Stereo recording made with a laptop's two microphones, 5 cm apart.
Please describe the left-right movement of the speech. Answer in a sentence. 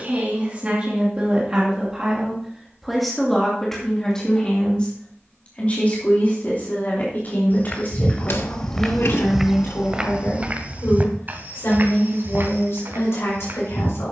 You can hear the speech travel towards the left.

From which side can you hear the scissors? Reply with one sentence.
You can hear the scissors on the left.